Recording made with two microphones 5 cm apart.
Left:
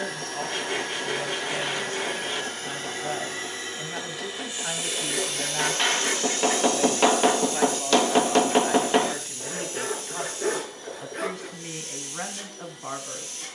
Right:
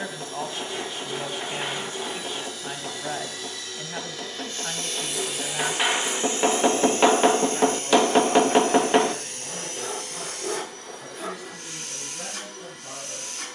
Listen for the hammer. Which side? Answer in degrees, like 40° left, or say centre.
10° right.